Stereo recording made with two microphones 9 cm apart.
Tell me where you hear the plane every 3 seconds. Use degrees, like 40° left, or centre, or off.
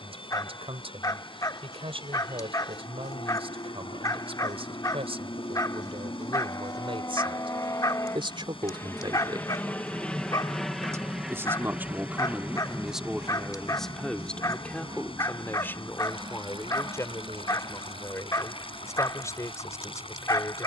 60° left, 50° left, 40° left, 10° left, 30° right, 50° right, 60° right.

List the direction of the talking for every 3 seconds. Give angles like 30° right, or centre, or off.
70° right, 70° right, 60° right, 30° right, centre, 30° left, 30° left.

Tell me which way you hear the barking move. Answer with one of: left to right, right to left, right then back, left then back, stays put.
stays put.